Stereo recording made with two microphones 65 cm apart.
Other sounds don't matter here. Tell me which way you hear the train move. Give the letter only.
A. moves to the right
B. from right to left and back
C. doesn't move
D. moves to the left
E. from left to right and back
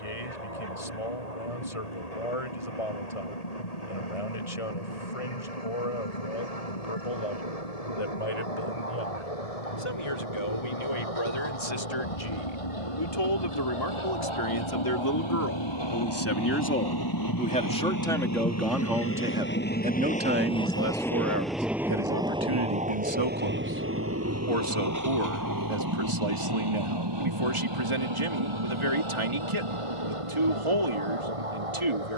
A.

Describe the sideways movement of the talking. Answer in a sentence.
You can hear the talking move from left to right.